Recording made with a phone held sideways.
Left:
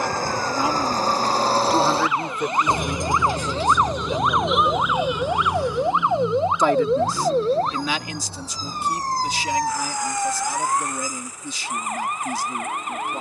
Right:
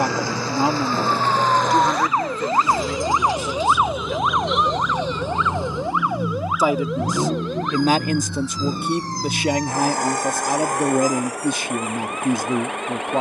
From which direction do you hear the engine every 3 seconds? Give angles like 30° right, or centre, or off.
30° left, centre, 40° right, 60° right, 70° right.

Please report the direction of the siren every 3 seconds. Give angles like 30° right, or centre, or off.
40° right, centre, 30° left, 50° left, 50° left.